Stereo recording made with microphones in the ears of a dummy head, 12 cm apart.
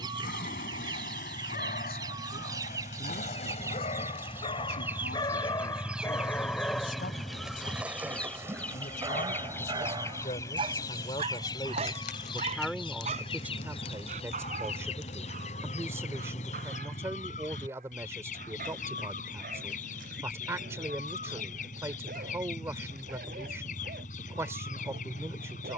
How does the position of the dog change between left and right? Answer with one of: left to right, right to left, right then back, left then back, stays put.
left to right.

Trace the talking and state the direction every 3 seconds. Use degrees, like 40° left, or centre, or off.
80° left, 80° left, 70° left, 40° left, 10° right, 20° right, 20° right, 20° right, 20° right.